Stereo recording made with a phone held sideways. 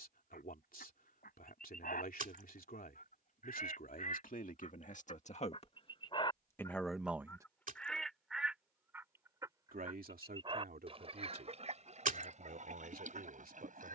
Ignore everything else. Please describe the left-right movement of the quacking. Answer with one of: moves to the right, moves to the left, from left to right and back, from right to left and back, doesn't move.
moves to the right.